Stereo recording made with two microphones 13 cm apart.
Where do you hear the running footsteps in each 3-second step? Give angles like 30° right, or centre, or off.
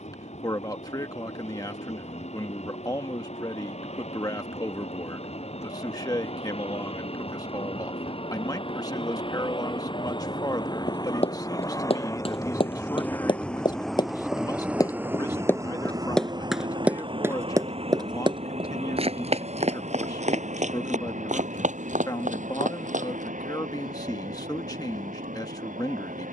off, off, off, 50° left, 40° left, 10° right, 60° right, 80° right, off.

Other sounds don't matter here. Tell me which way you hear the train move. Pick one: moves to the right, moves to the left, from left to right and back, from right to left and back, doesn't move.
moves to the right.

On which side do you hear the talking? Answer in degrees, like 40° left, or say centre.
30° left.